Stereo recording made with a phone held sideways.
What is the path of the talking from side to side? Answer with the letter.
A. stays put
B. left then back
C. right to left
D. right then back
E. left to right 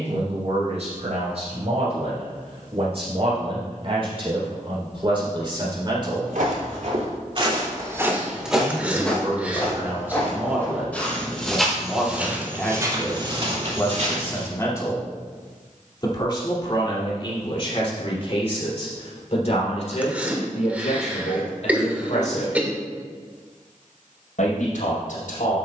C.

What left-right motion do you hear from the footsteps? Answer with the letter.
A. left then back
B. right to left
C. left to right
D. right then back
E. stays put
A.